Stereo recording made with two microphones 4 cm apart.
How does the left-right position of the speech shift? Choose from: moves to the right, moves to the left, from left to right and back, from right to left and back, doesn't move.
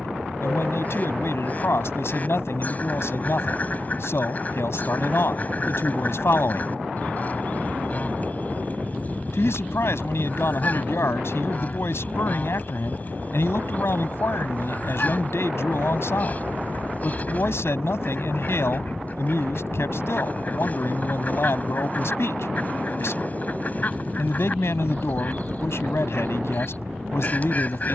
doesn't move.